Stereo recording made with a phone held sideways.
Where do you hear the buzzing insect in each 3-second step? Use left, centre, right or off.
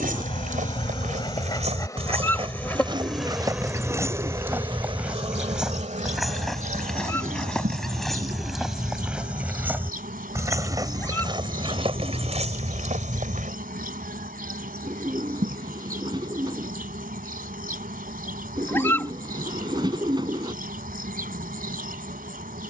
left, right, right, right, right, right, right, right.